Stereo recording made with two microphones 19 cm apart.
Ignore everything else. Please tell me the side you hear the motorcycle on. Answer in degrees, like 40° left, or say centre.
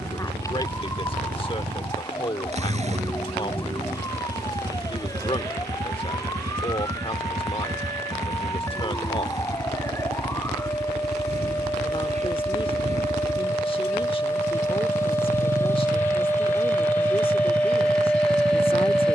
40° right.